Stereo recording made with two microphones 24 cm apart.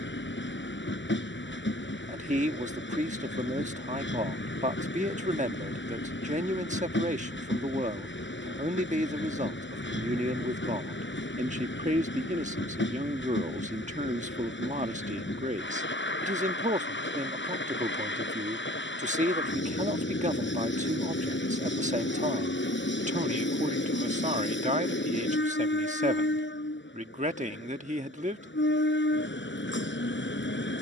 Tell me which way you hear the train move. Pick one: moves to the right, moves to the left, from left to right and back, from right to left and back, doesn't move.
doesn't move.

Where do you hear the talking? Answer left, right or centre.
right.